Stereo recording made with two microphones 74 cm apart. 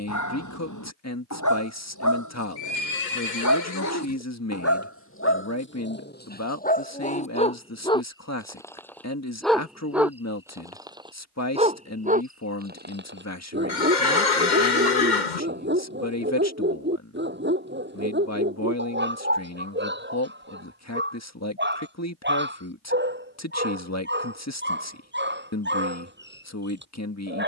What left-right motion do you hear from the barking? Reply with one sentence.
In this clip you hear the barking move from left to right.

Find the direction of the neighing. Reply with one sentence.
You can hear the neighing on the left.